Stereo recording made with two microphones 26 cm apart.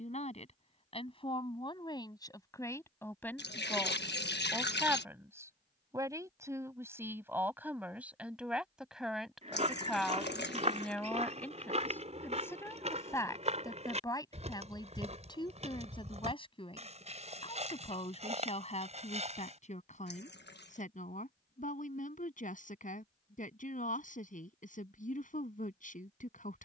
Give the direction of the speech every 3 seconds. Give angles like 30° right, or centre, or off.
20° left, centre, 10° right, centre, 10° left, 20° left, 30° left, 30° left, 30° left.